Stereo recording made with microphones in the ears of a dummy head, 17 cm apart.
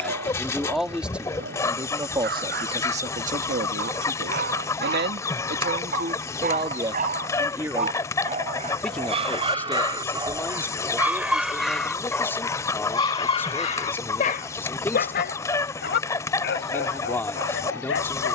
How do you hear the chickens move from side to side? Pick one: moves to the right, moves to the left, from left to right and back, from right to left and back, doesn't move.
doesn't move.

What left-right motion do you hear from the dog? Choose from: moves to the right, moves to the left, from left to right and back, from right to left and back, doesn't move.
moves to the left.